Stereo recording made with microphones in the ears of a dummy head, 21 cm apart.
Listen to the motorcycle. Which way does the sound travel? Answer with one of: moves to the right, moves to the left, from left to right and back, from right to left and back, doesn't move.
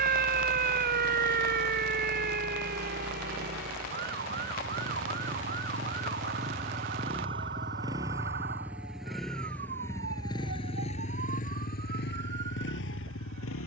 moves to the left.